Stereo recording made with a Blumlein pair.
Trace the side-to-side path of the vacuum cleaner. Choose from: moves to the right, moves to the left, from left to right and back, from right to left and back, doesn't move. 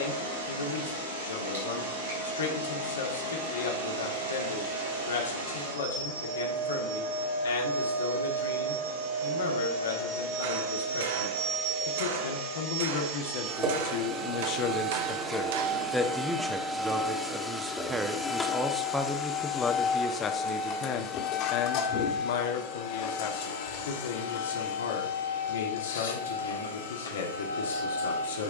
moves to the left.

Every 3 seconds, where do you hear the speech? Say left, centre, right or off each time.
left, left, left, left, left, centre, centre, left, left, left.